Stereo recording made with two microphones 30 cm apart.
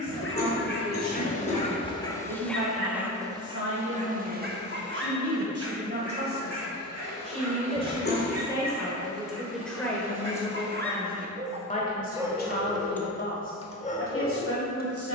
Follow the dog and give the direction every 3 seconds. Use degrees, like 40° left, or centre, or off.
20° left, 30° right, 60° right, 40° right, 10° left.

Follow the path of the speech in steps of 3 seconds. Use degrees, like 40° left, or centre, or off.
50° right, 40° right, 20° right, 10° left, 40° left.